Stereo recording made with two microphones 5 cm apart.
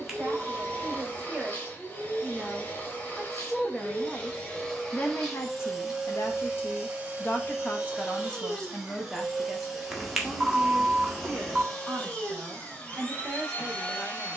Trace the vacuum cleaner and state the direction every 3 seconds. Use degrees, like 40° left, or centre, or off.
30° left, 10° left, 20° right, centre, 20° left.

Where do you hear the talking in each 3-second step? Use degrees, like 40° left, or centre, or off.
20° right, 20° left, 30° left, 10° right, 20° right.